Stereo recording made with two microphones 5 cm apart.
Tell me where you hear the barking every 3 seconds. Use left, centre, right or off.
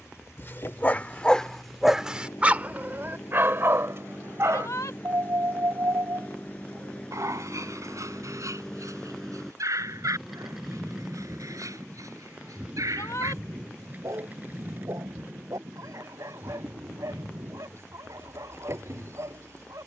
centre, right, right, right, right, right, right.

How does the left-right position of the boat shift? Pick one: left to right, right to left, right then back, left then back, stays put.
left to right.